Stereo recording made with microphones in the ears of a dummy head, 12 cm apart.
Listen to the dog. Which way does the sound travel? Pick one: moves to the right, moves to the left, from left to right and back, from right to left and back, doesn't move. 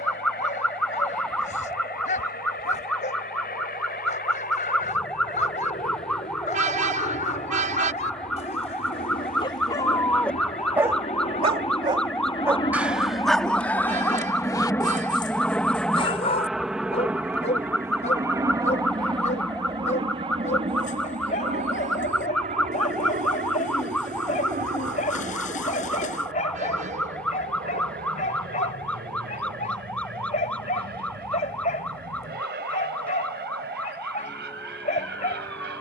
from left to right and back.